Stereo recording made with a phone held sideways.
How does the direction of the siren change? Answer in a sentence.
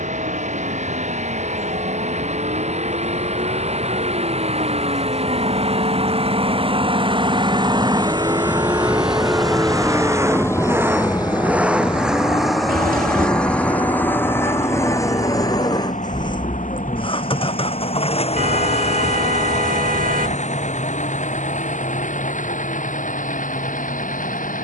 You can hear the siren go from the right side to the left.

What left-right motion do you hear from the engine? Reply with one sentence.
In this clip you hear the engine travel towards the left.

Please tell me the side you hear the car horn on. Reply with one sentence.
In this clip you hear the car horn on the right.